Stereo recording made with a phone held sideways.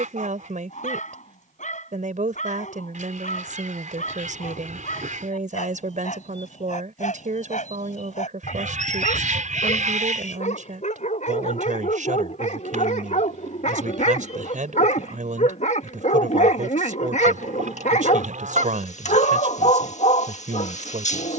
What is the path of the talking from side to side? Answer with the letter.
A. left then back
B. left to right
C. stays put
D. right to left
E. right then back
C.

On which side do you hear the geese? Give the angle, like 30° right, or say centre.
70° right.